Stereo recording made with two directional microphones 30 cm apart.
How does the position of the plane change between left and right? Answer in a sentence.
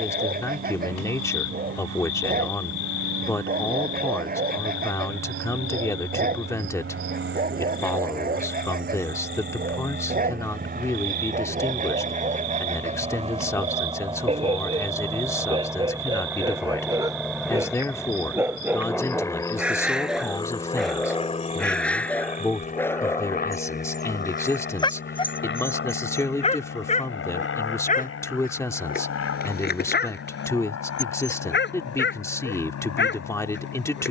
You can hear the plane move to the left.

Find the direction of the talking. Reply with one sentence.
You can hear the talking in the centre.